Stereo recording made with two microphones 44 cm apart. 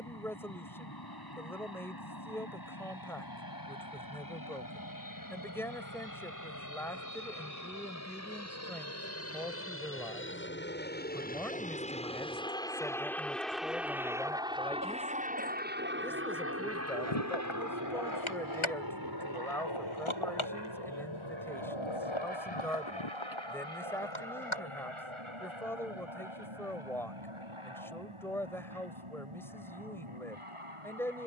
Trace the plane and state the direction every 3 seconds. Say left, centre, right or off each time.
left, left, left, left, centre, right, right, right, right, right, right.